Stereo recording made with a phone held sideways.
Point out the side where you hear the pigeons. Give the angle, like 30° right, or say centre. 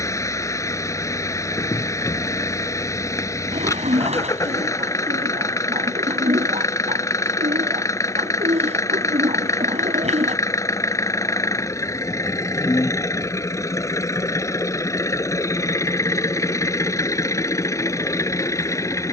40° right.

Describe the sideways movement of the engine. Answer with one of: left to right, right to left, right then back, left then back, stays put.
stays put.